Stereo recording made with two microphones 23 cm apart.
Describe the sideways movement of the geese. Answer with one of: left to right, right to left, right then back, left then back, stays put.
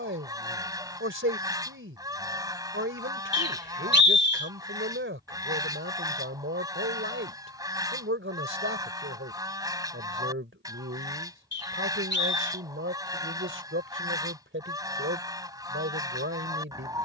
stays put.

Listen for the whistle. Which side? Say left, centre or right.
left.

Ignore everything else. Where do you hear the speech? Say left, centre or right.
right.